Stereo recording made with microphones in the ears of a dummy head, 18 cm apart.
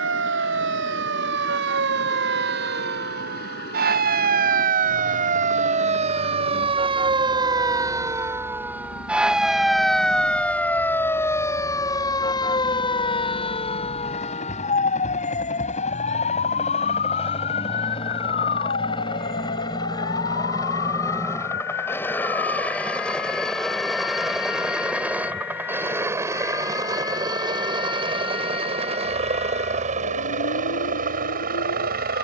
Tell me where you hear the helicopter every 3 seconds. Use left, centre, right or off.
left, left, left, left, left, left, left, centre, centre, right, right.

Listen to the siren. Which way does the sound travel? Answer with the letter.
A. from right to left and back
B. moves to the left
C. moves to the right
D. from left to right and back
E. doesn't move
B.